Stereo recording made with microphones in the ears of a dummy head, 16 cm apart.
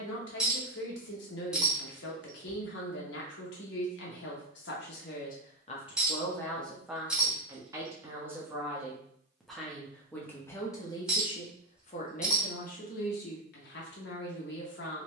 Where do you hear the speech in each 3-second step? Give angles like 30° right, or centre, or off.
70° left, 60° left, centre, 20° left, 60° left.